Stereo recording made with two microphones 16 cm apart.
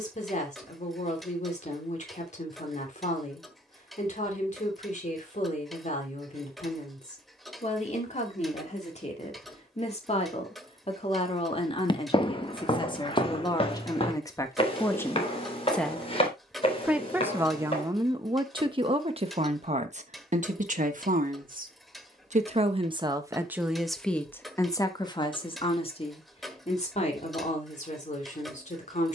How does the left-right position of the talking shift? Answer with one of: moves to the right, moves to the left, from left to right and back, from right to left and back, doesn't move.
from left to right and back.